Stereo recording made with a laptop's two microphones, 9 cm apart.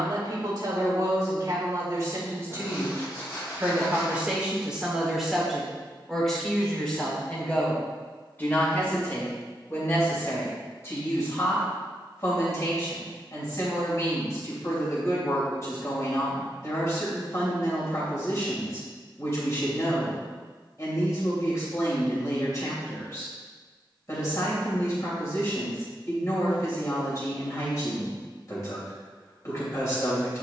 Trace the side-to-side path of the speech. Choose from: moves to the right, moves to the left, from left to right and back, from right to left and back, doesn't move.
moves to the left.